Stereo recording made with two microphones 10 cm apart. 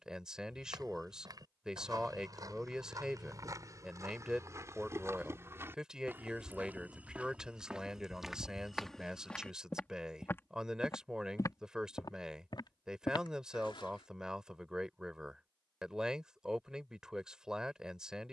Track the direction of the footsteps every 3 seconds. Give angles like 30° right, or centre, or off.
40° right, 30° right, 10° right, 20° left, 60° left, off.